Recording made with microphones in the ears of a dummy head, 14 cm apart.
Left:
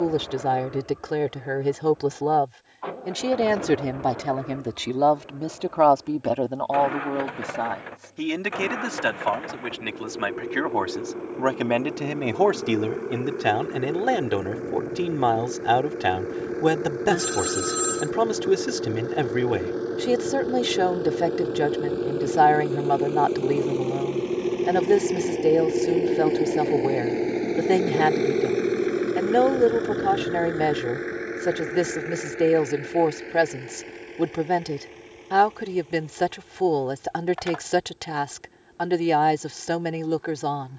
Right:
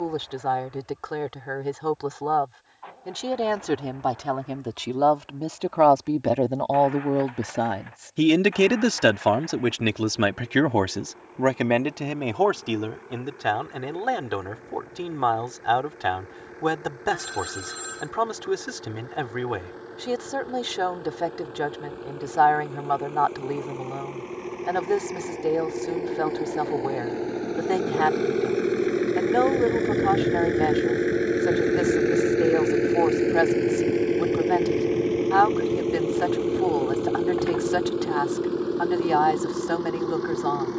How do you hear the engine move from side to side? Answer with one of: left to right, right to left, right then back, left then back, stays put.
left to right.